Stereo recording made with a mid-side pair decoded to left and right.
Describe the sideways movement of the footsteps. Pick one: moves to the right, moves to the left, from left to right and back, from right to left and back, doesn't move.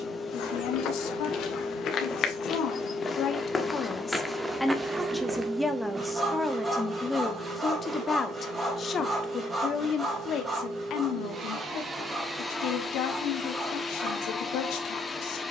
moves to the right.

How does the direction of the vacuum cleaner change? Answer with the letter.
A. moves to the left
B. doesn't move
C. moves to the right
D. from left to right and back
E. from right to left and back
D.